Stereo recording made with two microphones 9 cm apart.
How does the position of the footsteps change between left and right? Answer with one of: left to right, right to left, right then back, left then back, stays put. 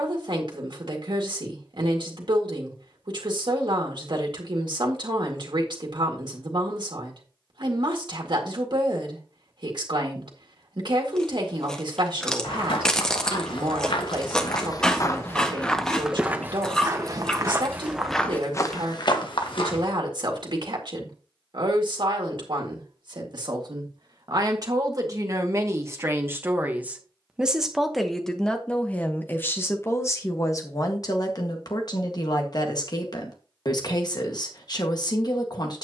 right then back.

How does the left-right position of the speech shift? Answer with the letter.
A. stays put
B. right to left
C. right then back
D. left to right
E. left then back
B.